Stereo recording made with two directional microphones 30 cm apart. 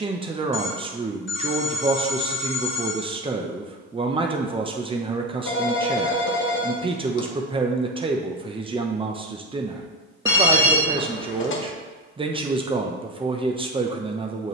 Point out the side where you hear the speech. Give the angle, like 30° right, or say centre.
20° right.